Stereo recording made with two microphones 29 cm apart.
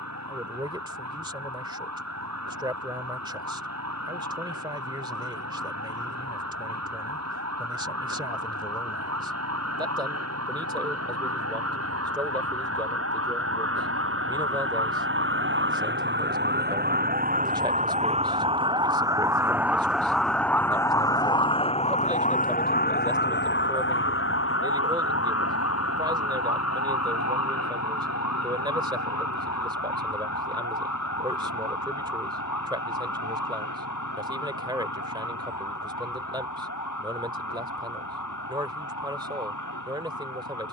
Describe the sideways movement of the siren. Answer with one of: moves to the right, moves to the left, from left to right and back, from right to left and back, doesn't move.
moves to the left.